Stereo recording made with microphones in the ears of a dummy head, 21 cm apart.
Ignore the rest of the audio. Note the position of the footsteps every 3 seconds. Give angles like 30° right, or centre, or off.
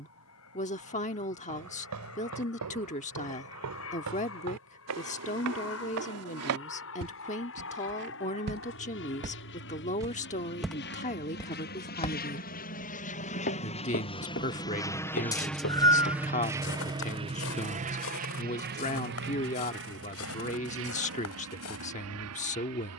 80° right, 80° right, 60° right, 10° right, 50° left, 60° left, 60° left, 70° left.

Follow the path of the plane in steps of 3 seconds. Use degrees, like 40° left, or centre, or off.
70° left, 70° left, 60° left, 50° left, 30° left, 10° right, 50° right, 60° right.